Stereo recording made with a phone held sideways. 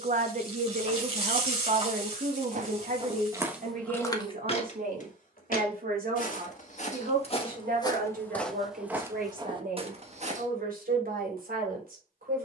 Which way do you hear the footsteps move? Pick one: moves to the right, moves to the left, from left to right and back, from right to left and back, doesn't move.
from right to left and back.